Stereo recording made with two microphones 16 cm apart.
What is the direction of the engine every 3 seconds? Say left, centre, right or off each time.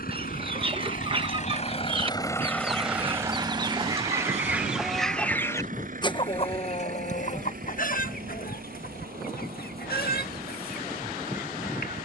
left, right, right, right.